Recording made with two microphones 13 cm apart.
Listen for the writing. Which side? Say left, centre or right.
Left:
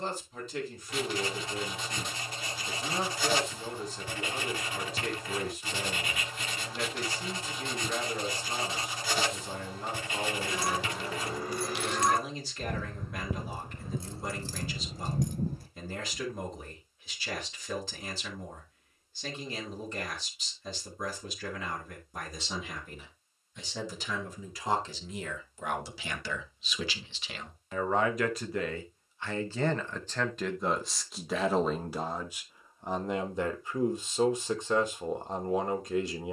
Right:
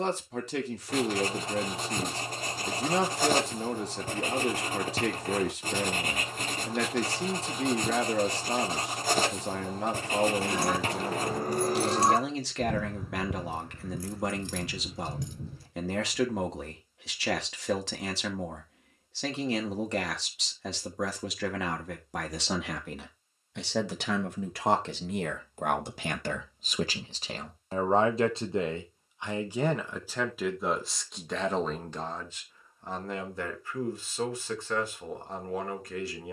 right.